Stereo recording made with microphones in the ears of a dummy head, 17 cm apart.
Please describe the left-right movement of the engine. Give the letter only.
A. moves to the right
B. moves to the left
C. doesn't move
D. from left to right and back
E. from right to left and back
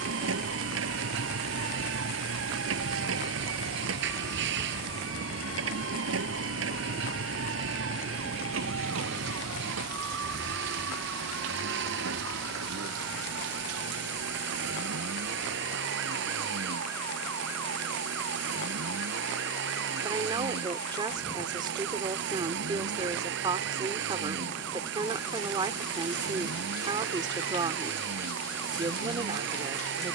C.